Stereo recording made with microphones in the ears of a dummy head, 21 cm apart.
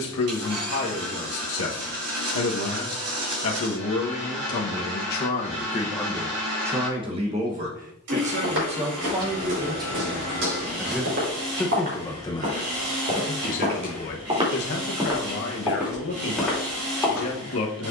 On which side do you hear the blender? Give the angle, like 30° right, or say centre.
70° right.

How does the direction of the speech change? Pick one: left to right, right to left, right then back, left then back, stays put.
right then back.